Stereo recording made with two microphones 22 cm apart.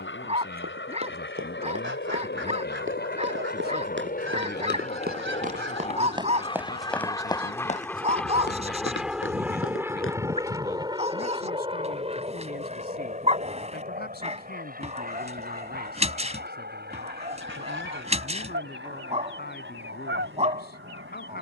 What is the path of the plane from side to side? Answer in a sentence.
In this clip you hear the plane move to the right.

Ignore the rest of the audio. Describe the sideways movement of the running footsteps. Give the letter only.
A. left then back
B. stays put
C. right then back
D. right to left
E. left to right
D.